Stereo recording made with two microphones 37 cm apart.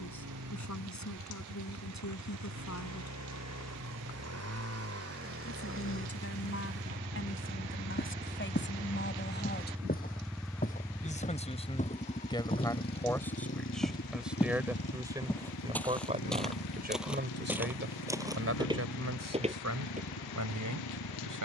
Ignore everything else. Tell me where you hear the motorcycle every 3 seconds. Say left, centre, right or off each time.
right, right, right, centre, left, left, left.